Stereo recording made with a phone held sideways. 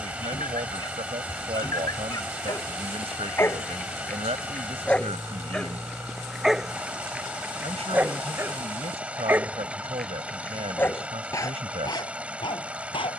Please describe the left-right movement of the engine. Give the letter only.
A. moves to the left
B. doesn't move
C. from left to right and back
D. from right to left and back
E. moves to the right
B.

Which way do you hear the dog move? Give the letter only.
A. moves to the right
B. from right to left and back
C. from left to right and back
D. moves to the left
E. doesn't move
C.